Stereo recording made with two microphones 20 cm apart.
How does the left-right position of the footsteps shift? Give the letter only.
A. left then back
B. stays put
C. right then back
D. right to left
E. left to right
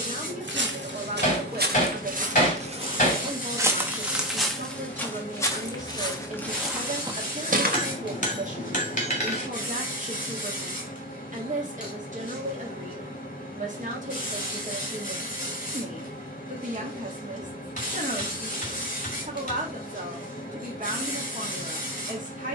A.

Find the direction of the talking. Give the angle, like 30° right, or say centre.
40° right.